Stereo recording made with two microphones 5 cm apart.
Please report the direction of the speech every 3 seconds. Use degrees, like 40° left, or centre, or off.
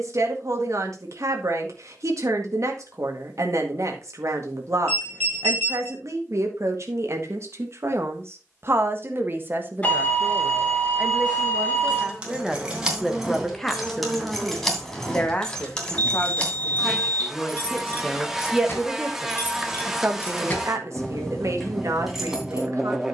70° right, 70° right, 60° right, 30° right, centre, 20° left, 30° right, 70° right.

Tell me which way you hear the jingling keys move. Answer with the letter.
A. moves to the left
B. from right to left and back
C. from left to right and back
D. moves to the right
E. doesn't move
B.